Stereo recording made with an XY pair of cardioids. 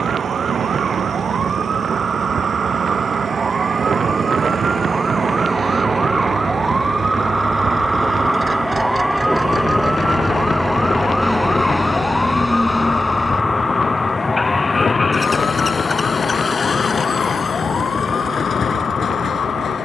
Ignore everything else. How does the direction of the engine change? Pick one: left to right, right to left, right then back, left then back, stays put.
right to left.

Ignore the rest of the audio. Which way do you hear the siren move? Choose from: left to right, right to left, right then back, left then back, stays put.
right to left.